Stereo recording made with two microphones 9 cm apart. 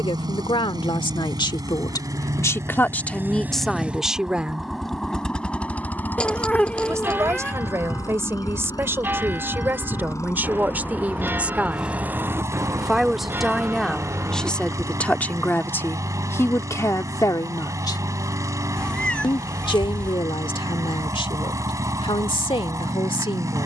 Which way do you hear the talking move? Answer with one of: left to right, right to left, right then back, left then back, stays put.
right then back.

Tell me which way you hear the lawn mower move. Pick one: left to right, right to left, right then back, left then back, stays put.
left then back.